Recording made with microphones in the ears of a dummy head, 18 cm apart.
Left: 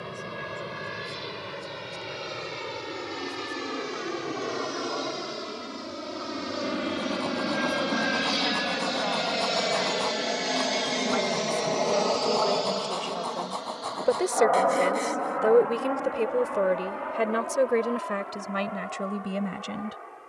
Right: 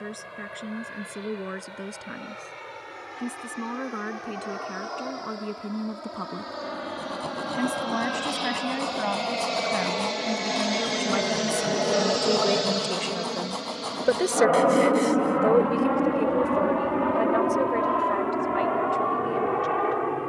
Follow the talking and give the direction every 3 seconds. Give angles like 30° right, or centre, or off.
70° right, 60° right, 60° right, 50° right, 20° right, 30° left, 60° left.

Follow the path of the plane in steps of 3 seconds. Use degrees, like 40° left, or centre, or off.
60° left, 50° left, 30° left, centre, 30° right, 50° right, 60° right.